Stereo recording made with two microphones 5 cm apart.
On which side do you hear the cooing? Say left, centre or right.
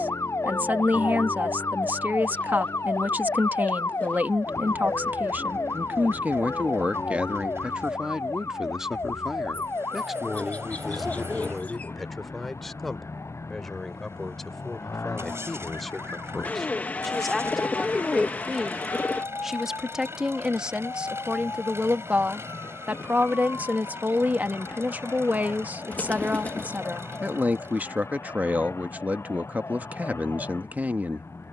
left.